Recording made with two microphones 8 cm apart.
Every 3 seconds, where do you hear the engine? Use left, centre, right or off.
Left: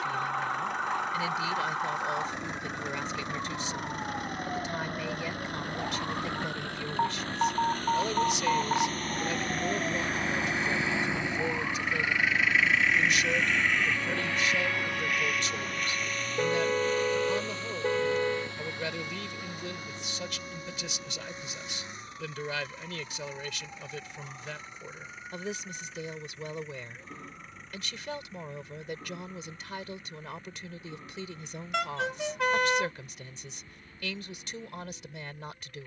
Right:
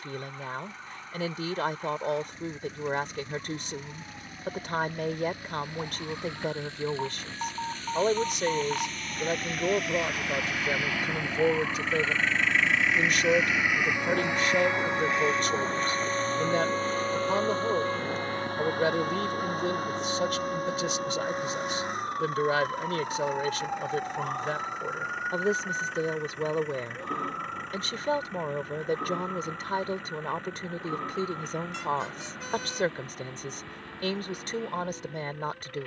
left, left, left, left, centre, right, right, right, right, right, right, right.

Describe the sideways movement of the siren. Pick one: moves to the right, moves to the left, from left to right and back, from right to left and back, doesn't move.
moves to the right.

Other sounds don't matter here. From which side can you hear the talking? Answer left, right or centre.
right.